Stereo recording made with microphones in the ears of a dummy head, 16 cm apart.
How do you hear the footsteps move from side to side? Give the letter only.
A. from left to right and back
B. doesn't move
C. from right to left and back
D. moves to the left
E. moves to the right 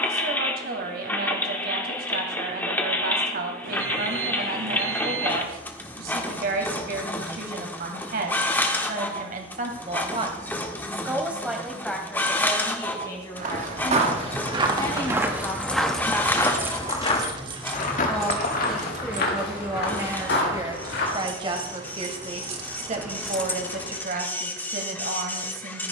D.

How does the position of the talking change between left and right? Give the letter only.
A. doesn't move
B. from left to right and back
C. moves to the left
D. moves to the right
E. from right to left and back
E.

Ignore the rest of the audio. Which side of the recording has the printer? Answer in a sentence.
You can hear the printer in the centre.